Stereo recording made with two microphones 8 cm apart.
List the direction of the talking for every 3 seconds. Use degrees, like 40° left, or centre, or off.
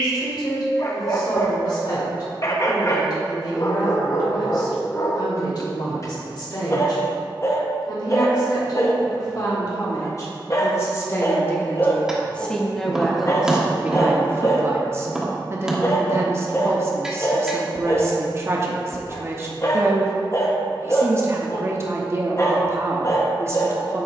50° left, 50° left, 50° left, 30° left, 10° right, 30° right, 30° right, 30° right.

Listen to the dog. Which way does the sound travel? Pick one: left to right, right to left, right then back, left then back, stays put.
stays put.